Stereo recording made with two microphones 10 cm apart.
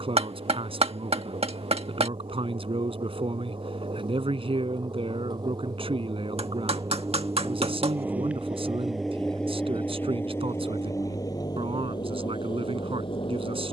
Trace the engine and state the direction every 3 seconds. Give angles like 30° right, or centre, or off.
60° right, 50° right, 20° right, 20° left, 50° left.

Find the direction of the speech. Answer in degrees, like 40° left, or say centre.
60° right.